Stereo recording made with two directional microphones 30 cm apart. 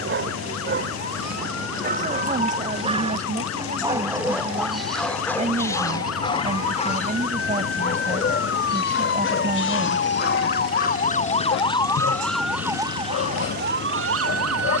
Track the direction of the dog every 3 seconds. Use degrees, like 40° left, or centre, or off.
30° right, centre, 30° left, 50° left, 50° left.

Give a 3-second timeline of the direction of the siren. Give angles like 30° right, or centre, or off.
60° left, 60° left, 50° left, 30° left, 30° right.